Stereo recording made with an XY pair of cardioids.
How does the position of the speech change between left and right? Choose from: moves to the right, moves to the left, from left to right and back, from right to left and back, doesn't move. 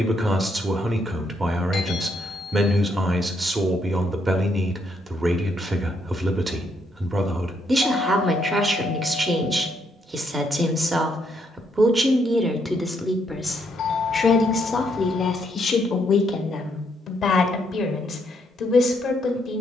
moves to the left.